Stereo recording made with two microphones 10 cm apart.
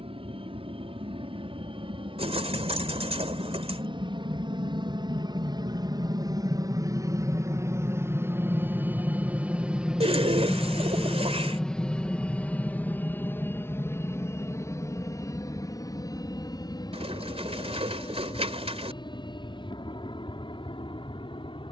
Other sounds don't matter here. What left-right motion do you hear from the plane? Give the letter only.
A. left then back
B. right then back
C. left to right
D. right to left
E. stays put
D.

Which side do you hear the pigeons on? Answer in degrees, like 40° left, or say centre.
70° right.